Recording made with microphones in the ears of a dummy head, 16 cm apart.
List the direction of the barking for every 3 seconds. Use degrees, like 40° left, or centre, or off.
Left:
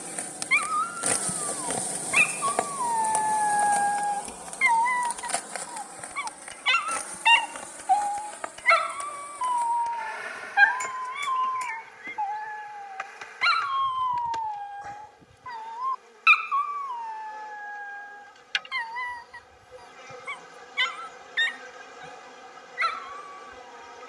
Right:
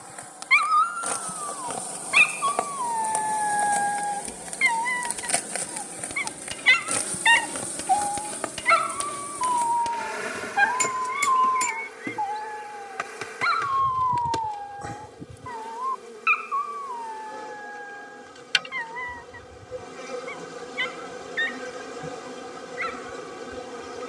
60° right, 40° right, 10° right, 20° left, 40° left, 50° left, 50° left, 60° left.